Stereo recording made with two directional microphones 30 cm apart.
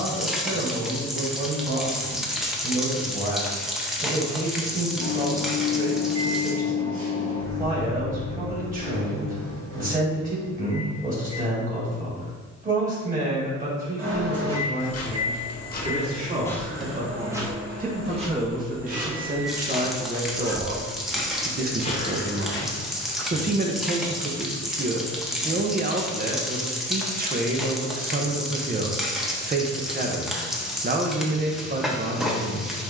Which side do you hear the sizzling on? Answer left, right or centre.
centre.